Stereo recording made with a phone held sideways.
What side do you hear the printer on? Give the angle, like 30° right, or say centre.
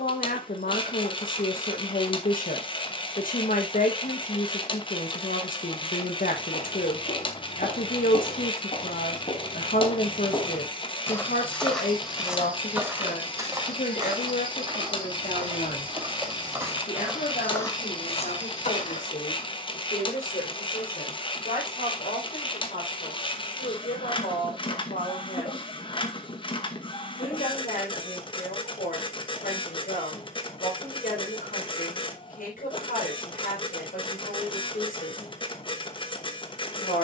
40° left.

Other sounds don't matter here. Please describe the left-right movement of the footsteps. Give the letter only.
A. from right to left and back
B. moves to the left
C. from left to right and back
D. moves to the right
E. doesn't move
C.